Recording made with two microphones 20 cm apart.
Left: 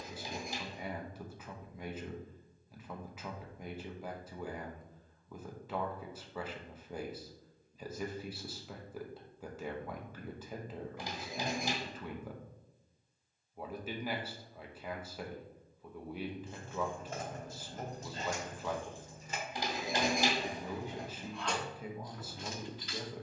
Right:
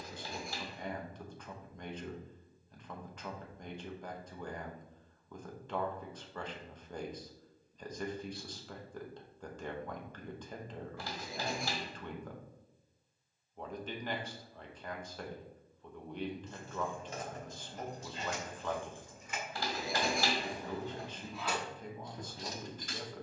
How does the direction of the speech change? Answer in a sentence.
In this clip you hear the speech stay in one place.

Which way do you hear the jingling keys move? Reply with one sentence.
You can hear the jingling keys move from left to right.